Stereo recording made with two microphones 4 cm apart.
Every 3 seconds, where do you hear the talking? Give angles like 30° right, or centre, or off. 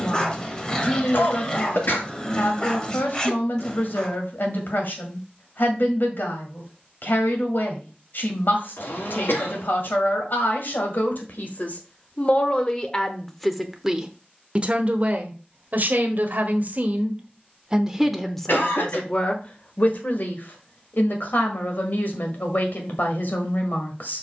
60° left, 60° left, 60° left, 60° left, centre, 40° right, 30° left, 60° left.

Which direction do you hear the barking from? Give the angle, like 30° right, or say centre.
20° left.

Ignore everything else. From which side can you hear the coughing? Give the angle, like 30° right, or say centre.
70° left.